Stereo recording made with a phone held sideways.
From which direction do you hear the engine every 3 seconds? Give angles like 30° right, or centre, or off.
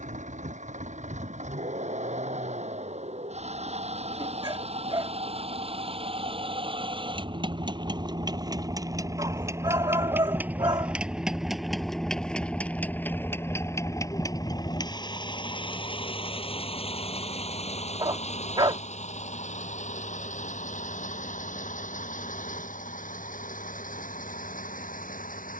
60° right, 50° right, 30° right, 10° right, 20° left, 40° left, 60° left, 60° left, 70° left.